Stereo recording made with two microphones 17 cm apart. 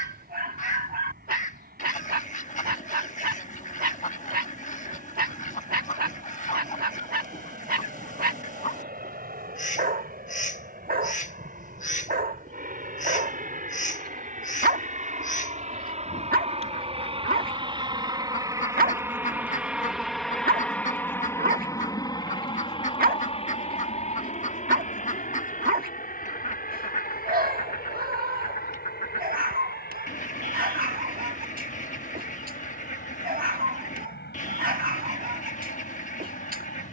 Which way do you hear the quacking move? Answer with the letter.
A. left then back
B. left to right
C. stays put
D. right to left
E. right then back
C.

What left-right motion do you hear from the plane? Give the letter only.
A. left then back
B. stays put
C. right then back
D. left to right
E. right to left
E.